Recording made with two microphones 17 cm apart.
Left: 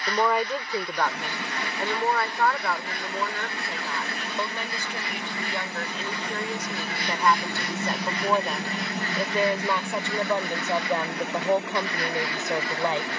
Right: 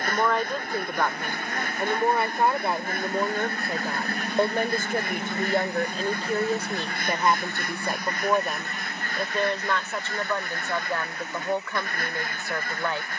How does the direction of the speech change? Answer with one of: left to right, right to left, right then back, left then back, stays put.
right then back.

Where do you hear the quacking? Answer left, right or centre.
right.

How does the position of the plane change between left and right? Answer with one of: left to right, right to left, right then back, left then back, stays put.
right to left.